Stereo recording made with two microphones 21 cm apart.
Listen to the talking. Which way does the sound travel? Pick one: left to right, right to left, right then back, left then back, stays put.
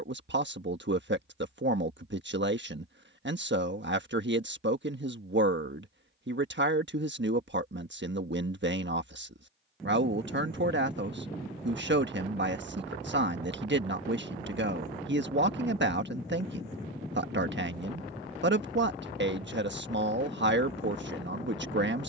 stays put.